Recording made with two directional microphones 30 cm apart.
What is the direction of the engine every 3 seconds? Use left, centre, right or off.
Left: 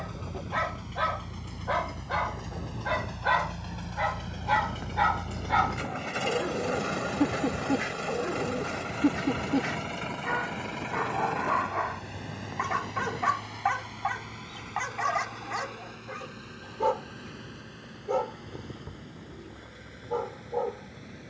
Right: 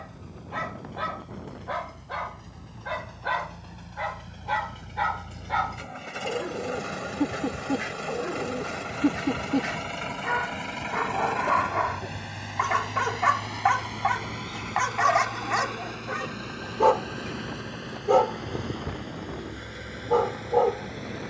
left, left, centre, right, right, right, right.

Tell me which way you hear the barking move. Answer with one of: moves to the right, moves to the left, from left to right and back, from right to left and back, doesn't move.
moves to the right.